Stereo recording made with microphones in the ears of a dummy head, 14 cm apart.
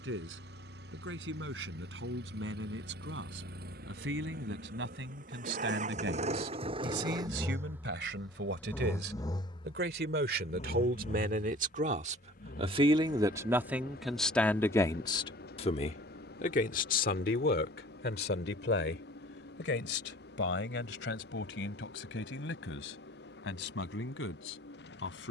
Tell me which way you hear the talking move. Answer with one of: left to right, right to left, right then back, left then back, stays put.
right to left.